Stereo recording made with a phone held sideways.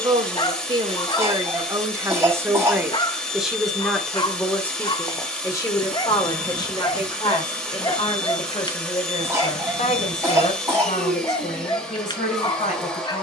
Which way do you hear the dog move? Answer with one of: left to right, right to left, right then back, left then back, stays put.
stays put.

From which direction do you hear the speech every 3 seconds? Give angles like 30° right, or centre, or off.
20° right, 10° left, 30° left, 50° left, 50° left.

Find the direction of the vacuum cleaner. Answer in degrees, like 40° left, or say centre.
centre.